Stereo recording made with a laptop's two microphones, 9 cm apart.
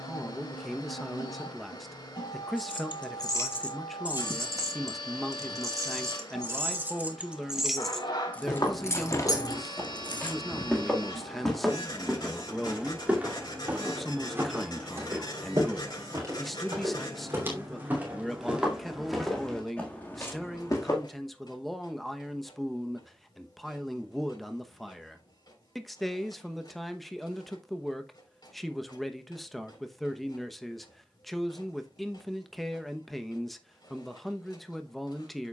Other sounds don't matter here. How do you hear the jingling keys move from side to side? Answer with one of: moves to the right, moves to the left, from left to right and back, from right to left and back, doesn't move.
from left to right and back.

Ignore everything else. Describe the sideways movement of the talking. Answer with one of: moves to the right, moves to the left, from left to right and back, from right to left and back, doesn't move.
doesn't move.